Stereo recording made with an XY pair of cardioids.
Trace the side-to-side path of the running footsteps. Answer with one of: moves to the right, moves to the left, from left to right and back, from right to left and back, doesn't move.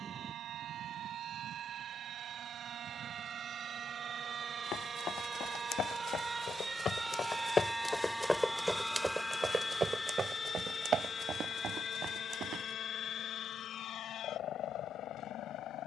moves to the right.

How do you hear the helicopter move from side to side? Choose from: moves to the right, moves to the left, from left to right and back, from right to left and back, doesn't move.
moves to the left.